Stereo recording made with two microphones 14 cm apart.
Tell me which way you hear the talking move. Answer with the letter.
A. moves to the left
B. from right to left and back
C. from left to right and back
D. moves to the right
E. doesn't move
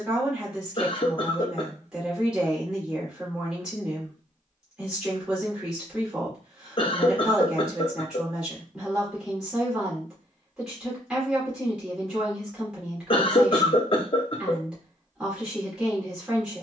E.